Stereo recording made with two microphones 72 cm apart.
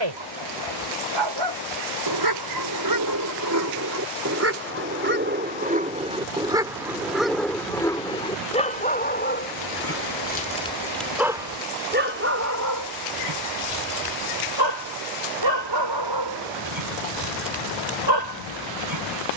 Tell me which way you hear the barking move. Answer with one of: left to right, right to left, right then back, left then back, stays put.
left then back.